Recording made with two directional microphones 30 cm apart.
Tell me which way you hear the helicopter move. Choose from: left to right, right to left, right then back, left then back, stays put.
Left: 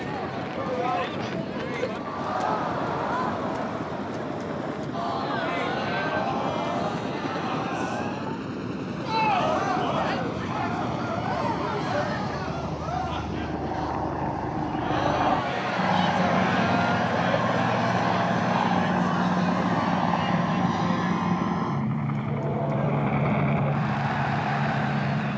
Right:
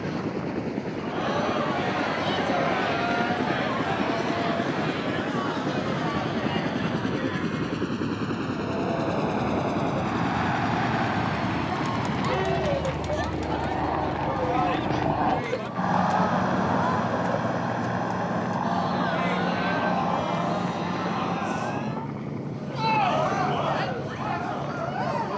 right to left.